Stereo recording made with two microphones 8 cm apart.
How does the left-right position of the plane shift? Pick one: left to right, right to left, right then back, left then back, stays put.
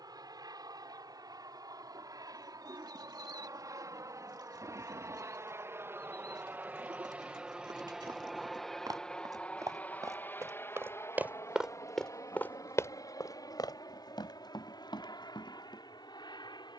right to left.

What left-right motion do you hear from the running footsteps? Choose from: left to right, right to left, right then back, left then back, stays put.
right to left.